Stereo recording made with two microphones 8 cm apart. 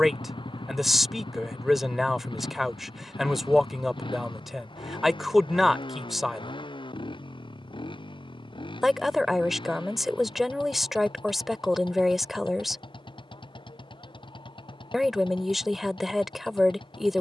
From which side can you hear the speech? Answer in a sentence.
In this clip you hear the speech in the centre.